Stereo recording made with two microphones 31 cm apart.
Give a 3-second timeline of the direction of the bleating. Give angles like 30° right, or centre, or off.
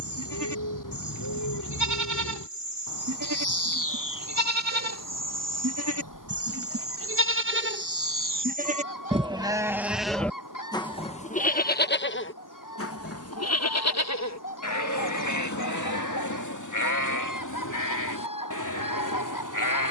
70° right, 60° right, 40° right, 10° left, 50° left, 70° left, 80° left.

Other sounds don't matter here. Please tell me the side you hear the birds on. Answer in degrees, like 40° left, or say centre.
80° left.